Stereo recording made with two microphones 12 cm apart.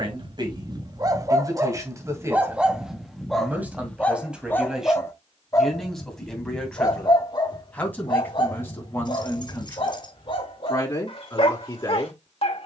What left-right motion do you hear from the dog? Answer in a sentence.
You can hear the dog move from right to left.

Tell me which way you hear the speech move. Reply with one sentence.
In this clip you hear the speech move to the left.